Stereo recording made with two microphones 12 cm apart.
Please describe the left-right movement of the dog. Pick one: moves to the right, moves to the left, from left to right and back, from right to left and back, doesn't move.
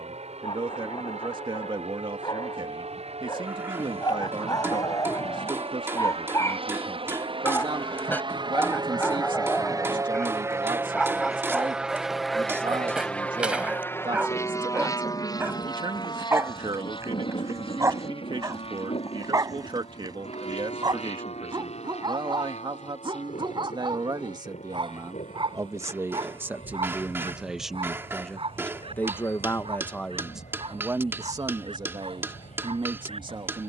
moves to the right.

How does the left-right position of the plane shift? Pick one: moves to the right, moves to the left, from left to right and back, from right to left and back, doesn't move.
moves to the left.